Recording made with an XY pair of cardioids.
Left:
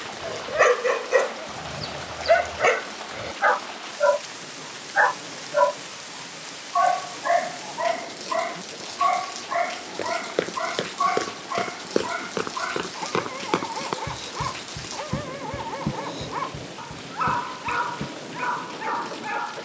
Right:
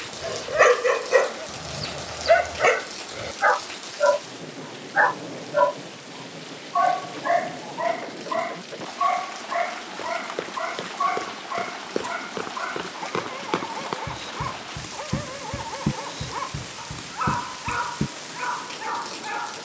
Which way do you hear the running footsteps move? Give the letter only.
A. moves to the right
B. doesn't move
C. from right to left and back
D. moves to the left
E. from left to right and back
A.